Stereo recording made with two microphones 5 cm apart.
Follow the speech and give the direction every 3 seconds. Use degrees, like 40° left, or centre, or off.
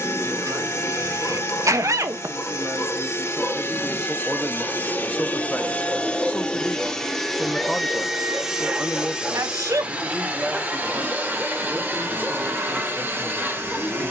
40° right, centre, 10° left, 30° right, 40° right.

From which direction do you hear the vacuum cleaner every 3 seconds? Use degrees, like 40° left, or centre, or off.
50° left, 40° left, centre, 30° right, 40° right.